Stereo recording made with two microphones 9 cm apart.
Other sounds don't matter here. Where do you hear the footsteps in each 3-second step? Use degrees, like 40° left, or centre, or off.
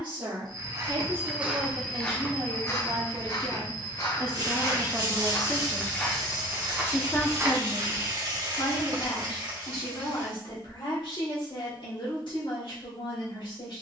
centre, 40° left, 20° right, off, off.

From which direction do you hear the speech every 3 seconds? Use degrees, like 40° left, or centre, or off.
60° right, 20° right, 40° left, 60° left, 70° left.